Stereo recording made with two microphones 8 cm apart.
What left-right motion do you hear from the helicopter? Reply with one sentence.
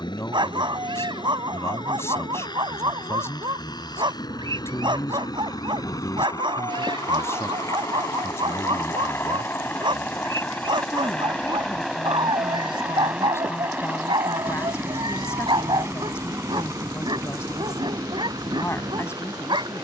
In this clip you hear the helicopter go from the left side to the right.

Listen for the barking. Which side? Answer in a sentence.
In this clip you hear the barking on the right.